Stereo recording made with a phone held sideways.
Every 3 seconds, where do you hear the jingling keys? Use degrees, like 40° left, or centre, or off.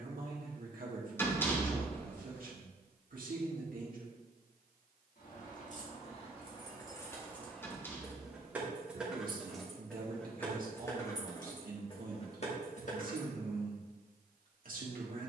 off, 50° left, 10° left, 10° left, 40° left.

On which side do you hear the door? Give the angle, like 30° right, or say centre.
10° left.